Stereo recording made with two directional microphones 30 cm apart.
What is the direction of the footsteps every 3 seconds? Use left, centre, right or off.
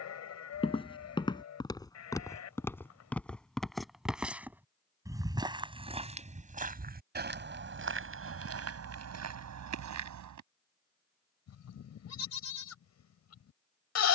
centre, centre, right, right, off.